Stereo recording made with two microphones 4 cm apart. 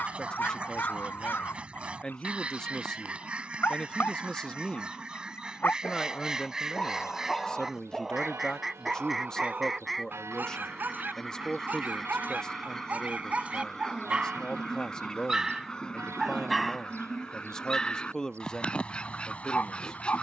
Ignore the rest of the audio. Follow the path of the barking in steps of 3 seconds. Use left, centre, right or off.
left, left, centre, right, right, centre, left.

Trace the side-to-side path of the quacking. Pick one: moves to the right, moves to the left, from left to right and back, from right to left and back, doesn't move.
moves to the left.